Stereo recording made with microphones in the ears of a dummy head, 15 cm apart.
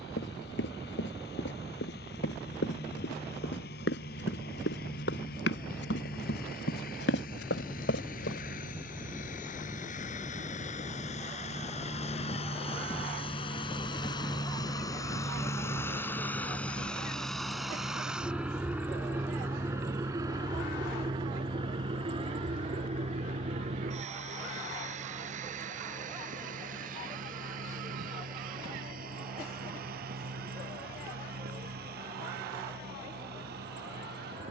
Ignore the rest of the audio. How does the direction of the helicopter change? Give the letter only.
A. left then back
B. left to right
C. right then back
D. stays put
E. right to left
B.